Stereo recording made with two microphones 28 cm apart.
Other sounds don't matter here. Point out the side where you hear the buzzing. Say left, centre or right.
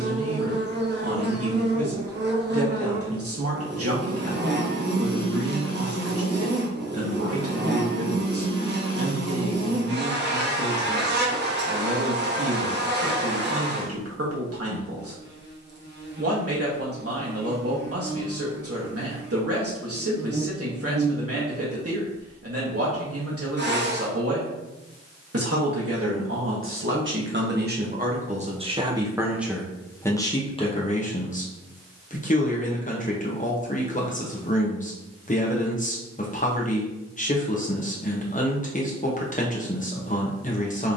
right.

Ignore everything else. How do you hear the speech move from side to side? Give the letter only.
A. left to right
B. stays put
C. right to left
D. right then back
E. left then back
C.